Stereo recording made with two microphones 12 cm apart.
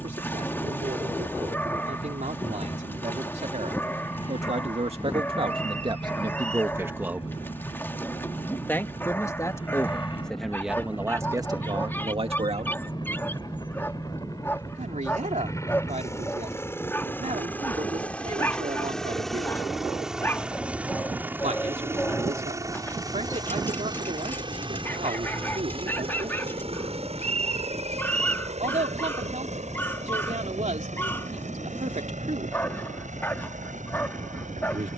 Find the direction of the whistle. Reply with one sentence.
In this clip you hear the whistle on the right.